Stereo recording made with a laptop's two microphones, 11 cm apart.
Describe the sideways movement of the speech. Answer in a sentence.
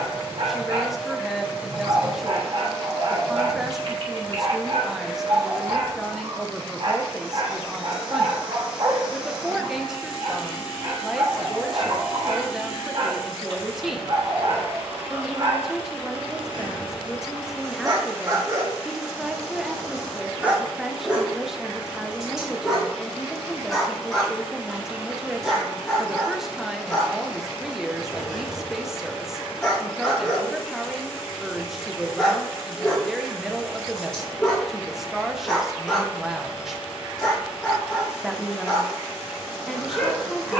In this clip you hear the speech stay put.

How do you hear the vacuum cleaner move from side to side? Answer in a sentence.
You can hear the vacuum cleaner stay put.